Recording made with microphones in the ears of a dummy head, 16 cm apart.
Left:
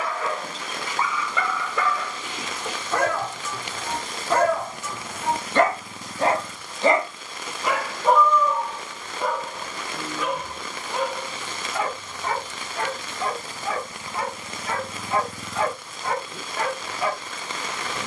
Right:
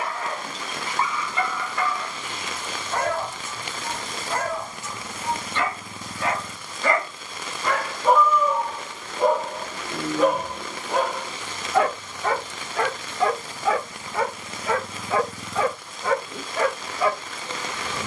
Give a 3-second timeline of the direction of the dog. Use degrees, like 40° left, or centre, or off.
70° left, 50° left, 10° left, 40° right, 60° right, 70° right.